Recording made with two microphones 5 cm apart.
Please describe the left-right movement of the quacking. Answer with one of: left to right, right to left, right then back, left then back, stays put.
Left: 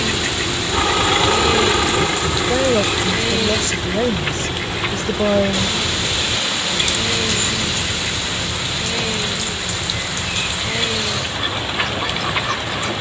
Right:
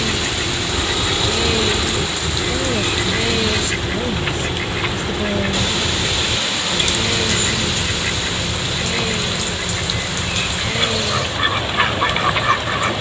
left to right.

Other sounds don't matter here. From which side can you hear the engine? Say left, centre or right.
left.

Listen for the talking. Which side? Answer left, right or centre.
left.